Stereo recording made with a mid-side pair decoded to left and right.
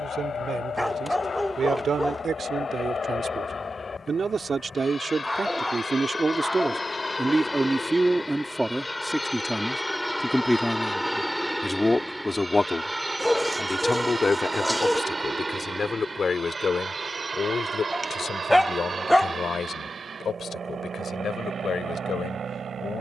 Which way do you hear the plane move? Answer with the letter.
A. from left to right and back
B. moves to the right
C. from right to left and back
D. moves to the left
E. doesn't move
B.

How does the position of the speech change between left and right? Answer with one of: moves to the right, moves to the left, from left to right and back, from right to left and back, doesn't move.
moves to the left.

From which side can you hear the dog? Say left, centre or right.
centre.